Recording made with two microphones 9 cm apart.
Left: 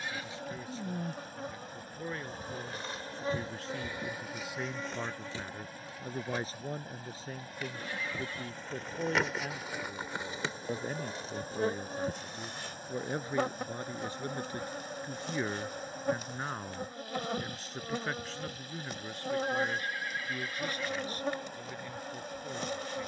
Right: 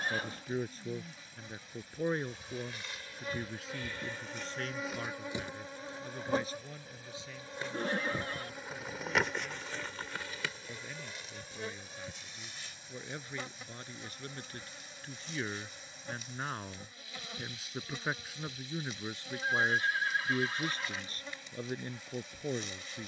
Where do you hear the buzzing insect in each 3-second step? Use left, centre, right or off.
left, centre, right, left, left, left, left, left.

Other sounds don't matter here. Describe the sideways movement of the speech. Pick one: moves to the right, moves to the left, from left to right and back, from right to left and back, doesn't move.
from right to left and back.